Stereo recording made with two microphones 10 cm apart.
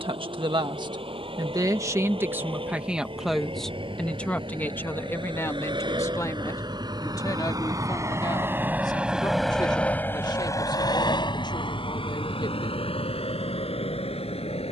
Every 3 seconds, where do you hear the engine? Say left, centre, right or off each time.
right, right, right, left, left.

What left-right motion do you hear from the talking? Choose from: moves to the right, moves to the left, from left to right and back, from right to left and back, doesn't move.
moves to the left.